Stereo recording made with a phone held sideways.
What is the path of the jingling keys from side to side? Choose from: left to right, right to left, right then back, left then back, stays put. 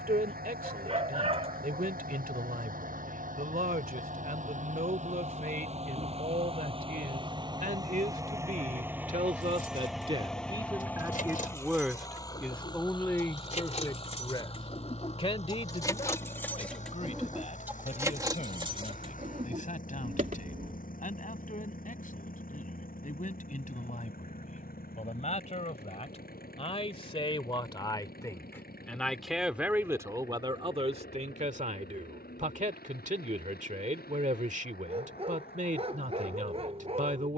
left to right.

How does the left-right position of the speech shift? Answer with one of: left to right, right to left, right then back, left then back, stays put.
left then back.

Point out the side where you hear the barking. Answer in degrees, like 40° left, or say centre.
40° right.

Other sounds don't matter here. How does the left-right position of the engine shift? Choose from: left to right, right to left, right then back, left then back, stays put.
right to left.